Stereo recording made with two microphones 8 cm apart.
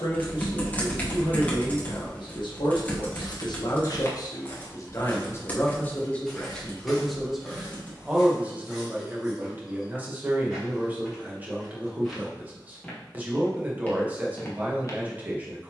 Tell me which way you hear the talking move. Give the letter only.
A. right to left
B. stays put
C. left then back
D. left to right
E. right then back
D.